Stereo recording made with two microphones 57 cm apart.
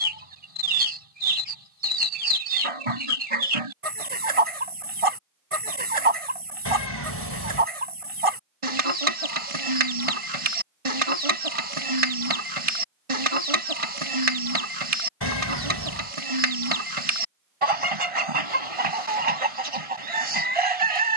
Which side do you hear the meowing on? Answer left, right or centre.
left.